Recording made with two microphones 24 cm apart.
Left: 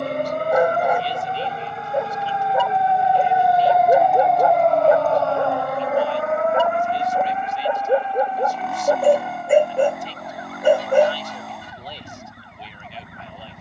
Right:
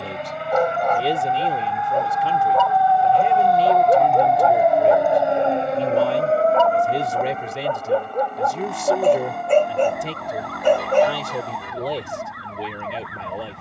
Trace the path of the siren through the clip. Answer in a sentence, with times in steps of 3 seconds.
In this clip you hear the siren on the left from 0 s, in the centre from 3 s and on the right from 6 s.